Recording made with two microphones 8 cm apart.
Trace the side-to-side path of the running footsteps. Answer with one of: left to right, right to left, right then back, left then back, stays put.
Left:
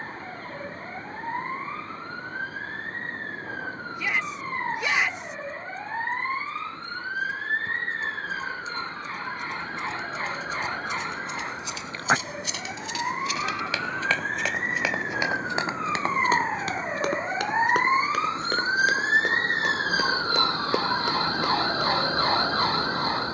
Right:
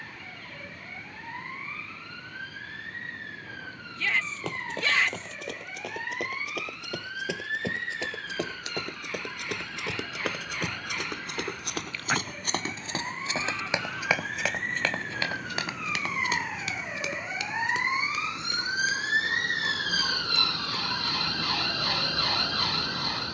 right to left.